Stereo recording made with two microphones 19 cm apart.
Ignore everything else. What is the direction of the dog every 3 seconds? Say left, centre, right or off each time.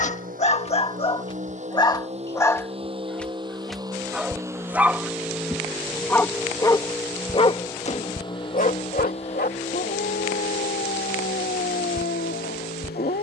left, centre, left, left, left.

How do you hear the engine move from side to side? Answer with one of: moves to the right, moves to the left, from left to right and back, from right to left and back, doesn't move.
moves to the left.